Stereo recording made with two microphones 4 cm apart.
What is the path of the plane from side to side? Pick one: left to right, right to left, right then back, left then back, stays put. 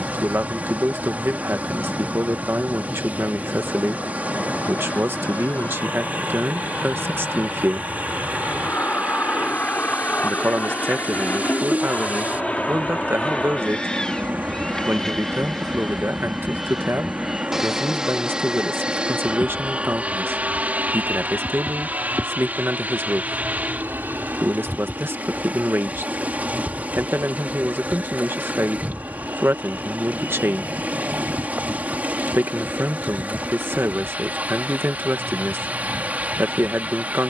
left to right.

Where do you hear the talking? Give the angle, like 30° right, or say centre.
60° right.